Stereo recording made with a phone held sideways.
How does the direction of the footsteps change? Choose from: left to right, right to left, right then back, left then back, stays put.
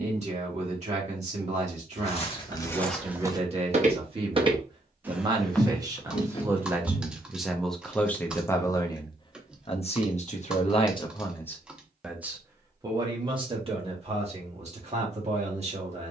right then back.